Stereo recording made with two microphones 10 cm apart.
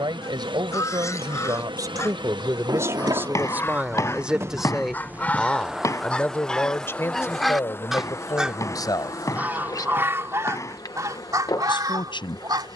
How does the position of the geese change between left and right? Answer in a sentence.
In this clip you hear the geese go from the left side to the right.